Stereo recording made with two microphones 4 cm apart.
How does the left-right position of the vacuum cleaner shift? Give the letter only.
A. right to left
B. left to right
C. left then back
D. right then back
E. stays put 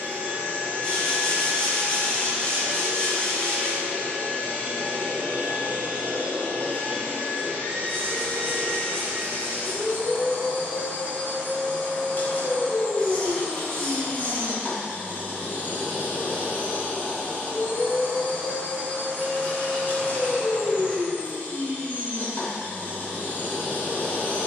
E.